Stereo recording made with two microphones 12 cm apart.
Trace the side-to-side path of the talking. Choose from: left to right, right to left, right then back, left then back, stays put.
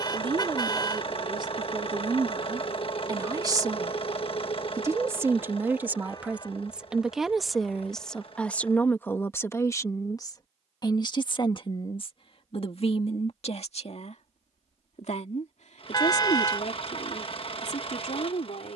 right to left.